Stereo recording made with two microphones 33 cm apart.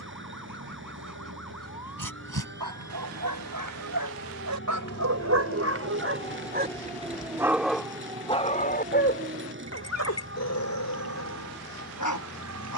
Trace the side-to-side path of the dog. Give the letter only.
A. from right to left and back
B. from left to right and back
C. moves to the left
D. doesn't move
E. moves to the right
C.